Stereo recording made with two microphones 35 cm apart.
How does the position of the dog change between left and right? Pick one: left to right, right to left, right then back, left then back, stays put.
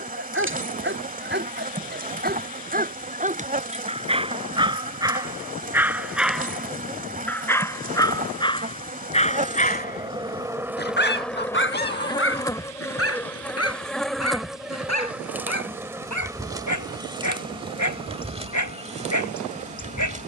right to left.